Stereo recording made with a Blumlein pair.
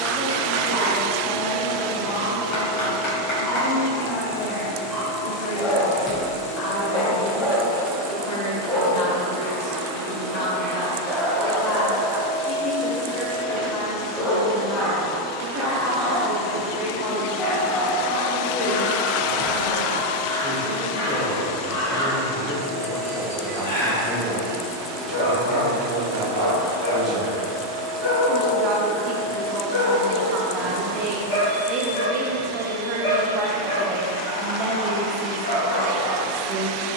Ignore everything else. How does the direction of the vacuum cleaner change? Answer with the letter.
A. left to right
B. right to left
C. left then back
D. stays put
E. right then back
C.